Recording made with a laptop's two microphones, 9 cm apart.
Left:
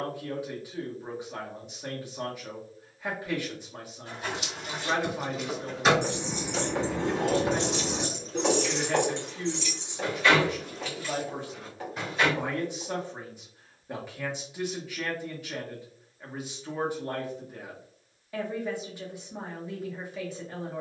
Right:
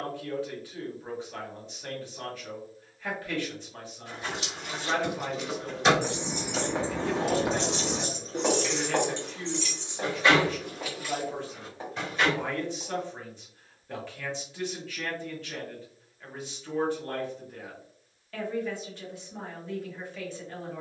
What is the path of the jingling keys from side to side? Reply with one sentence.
In this clip you hear the jingling keys move from left to right and back again.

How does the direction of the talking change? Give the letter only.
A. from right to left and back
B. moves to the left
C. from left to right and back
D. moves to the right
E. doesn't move
E.